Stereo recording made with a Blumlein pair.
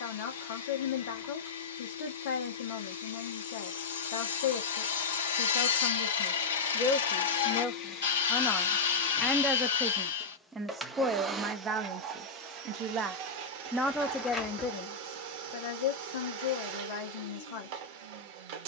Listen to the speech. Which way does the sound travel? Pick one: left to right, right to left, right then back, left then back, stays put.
right then back.